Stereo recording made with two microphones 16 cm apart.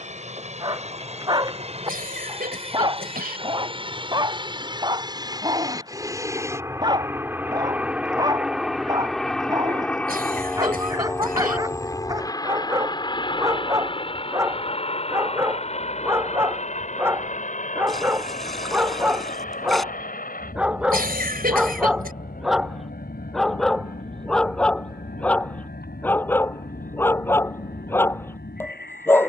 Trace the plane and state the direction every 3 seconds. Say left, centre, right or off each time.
right, right, centre, centre, left, left, left, left, left, left.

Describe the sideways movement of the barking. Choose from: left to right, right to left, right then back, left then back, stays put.
right to left.